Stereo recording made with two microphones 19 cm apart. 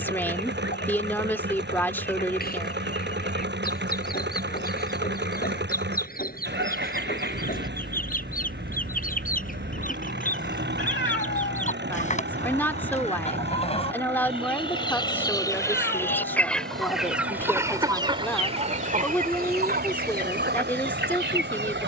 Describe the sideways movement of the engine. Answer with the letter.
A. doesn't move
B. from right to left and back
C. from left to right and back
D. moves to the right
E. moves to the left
A.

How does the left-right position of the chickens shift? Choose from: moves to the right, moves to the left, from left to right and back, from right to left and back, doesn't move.
moves to the right.